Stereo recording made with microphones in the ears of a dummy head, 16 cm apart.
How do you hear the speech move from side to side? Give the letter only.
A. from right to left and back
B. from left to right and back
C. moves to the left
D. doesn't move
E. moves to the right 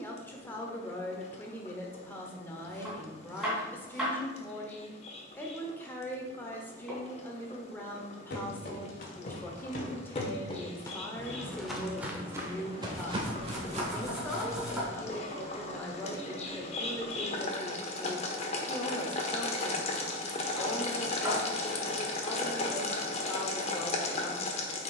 D.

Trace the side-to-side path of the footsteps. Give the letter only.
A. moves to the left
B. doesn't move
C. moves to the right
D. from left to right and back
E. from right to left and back
C.